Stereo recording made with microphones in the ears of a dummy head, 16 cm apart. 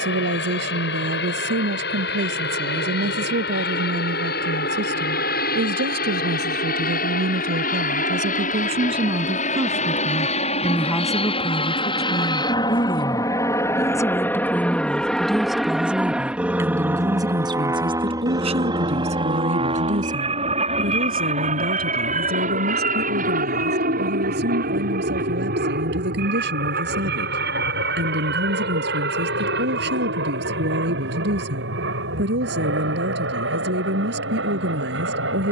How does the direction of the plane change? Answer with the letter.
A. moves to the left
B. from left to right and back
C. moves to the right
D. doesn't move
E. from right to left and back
C.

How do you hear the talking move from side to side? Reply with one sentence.
You can hear the talking move from right to left and back again.